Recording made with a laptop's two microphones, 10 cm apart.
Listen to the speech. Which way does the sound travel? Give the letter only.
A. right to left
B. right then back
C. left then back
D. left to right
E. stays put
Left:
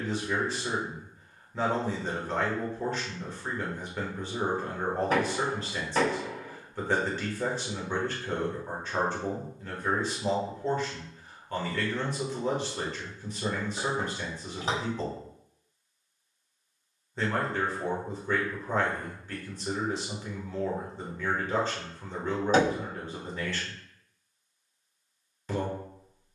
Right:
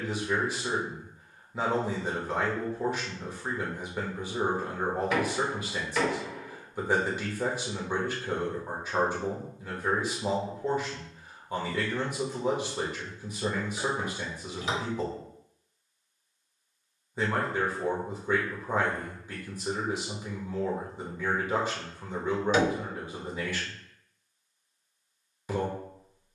E.